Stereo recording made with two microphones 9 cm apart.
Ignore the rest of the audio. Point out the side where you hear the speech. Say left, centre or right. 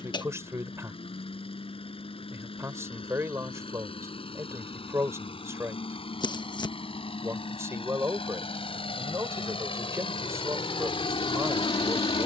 right.